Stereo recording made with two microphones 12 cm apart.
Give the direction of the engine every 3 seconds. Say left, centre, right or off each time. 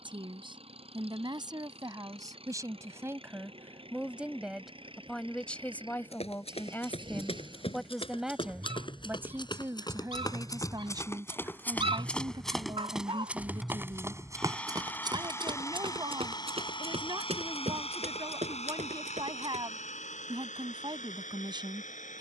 right, right, right, right, centre, left, left, left.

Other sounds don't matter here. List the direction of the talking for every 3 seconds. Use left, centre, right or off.
right, centre, centre, right, right, right, right, right.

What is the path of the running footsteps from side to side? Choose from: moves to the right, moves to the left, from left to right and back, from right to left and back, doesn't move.
moves to the right.